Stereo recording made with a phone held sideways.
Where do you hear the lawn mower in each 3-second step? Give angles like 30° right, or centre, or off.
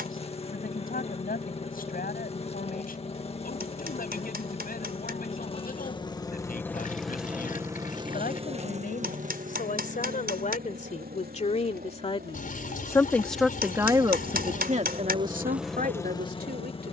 40° left, 40° left, 10° right, 70° right, 70° right, 10° left.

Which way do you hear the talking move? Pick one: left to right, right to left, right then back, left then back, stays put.
left to right.